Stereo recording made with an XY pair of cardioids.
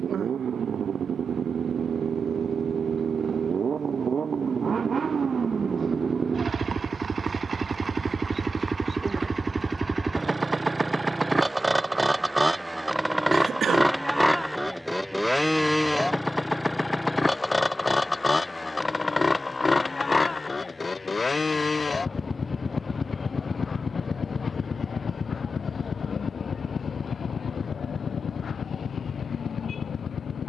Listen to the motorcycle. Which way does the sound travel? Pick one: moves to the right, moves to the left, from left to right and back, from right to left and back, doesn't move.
moves to the left.